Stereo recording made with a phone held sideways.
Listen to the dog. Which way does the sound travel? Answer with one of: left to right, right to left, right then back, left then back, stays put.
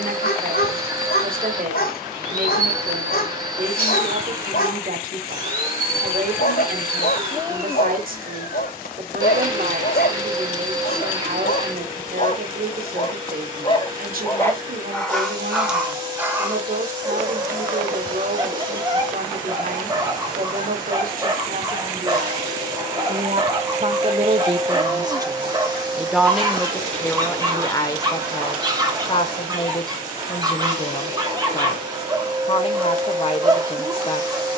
left to right.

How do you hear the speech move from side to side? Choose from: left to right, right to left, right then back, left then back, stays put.
right to left.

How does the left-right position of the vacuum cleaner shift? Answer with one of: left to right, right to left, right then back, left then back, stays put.
stays put.